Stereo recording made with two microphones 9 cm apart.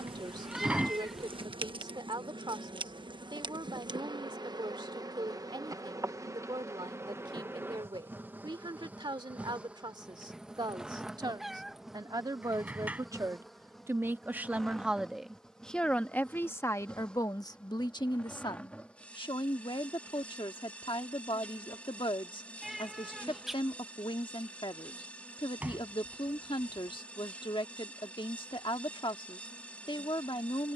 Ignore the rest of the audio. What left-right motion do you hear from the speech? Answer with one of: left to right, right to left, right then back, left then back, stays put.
right to left.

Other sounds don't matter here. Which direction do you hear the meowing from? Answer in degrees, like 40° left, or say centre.
centre.